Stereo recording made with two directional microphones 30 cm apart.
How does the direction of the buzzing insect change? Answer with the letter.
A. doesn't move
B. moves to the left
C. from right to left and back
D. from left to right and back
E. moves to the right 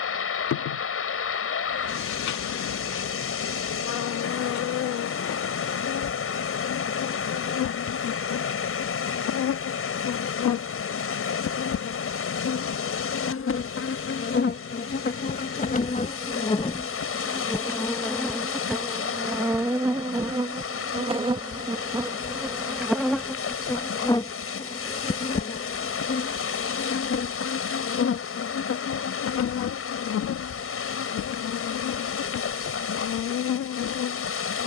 D.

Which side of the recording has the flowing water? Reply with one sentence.
You can hear the flowing water on the left.